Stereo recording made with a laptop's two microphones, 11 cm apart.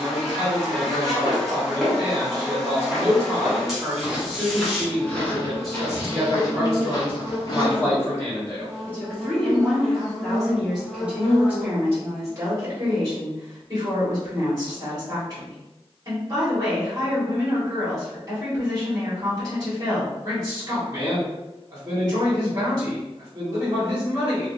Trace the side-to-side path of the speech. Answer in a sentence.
In this clip you hear the speech move from right to left and back again.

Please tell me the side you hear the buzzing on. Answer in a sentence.
You can hear the buzzing in the centre.